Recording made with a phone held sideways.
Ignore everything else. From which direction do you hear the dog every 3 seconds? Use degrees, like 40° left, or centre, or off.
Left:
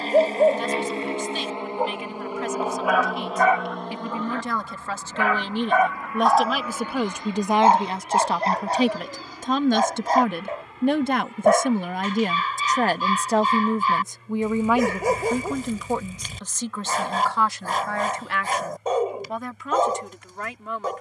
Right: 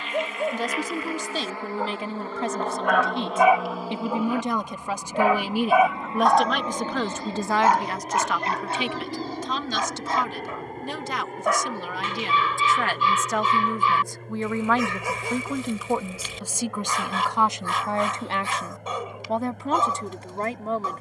40° left, 20° right, 20° left, 40° left, 40° left, 40° left, 40° left.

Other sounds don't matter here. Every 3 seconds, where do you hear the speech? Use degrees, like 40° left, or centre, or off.
40° right, 20° right, 20° left, 50° left, 30° left, 10° right, 30° right.